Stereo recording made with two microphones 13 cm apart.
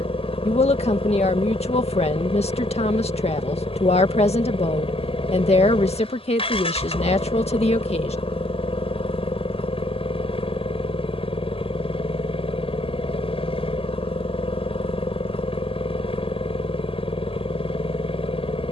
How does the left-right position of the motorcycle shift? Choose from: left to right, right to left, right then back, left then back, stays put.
stays put.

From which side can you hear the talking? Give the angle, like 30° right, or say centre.
50° left.